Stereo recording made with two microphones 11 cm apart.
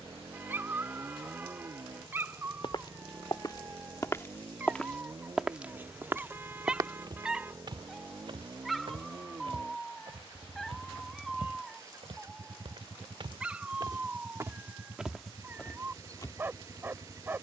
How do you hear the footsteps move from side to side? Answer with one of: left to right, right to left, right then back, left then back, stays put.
right then back.